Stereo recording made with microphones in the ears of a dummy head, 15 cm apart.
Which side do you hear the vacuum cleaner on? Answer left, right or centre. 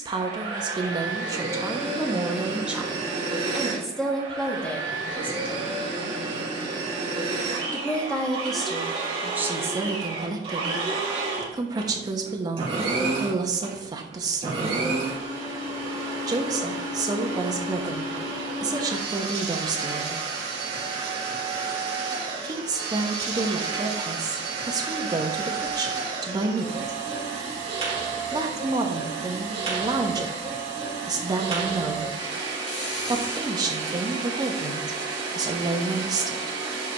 right.